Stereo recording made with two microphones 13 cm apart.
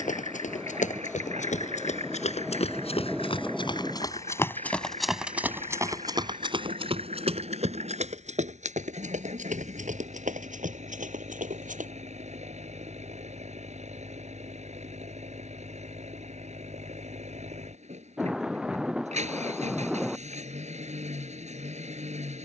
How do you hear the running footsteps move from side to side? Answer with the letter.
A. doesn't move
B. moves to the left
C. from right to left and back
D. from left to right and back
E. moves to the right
E.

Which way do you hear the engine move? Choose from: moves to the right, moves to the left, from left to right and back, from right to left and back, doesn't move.
doesn't move.